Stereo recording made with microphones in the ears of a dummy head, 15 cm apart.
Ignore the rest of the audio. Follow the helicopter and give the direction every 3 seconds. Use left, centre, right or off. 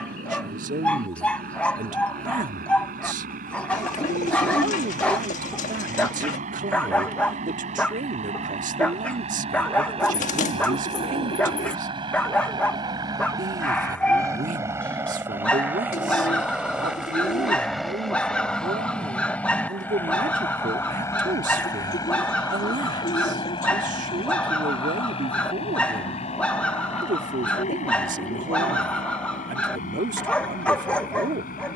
right, right, right, right, right, centre, centre, left, left, left, left.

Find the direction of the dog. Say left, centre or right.
centre.